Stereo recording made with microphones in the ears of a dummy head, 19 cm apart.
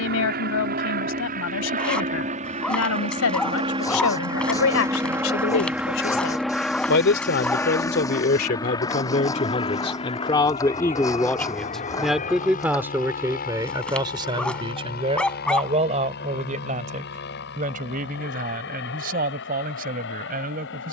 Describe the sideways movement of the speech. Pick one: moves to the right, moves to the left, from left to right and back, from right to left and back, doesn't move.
moves to the right.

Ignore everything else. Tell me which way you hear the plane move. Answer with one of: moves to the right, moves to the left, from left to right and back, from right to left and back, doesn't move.
moves to the left.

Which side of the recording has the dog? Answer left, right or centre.
centre.